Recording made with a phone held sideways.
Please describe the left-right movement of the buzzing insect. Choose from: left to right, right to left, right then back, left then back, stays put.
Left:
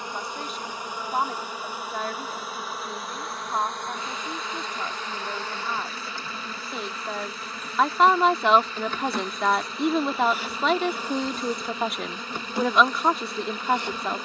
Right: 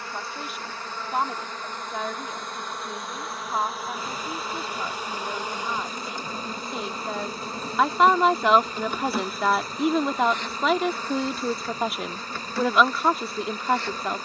right then back.